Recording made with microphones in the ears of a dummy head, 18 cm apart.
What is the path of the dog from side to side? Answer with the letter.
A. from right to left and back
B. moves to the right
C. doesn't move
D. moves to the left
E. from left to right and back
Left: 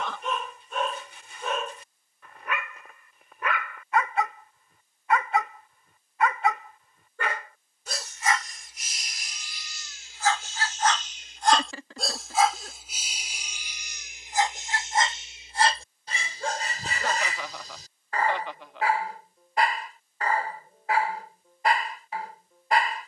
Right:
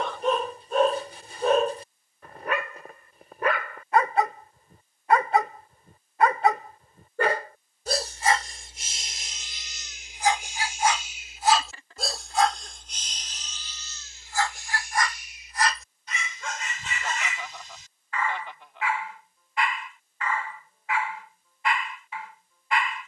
D.